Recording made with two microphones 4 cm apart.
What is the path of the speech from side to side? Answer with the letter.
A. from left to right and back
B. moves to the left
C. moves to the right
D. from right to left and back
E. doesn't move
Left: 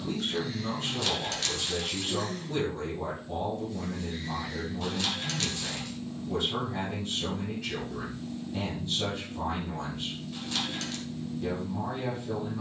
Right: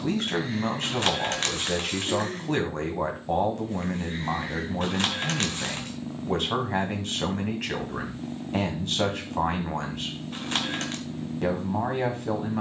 E.